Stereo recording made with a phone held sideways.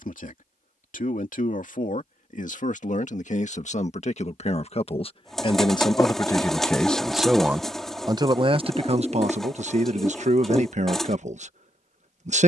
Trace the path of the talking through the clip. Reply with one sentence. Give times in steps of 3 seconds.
In this clip you hear the talking on the left from 0 s, in the centre from 6 s and on the right from 9 s.